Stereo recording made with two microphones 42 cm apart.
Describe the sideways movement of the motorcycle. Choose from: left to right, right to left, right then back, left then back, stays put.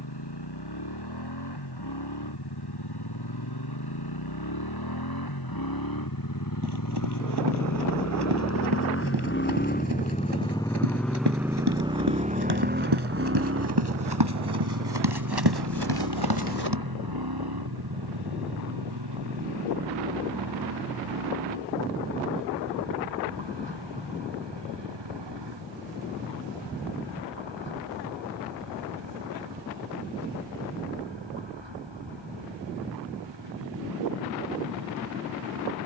left to right.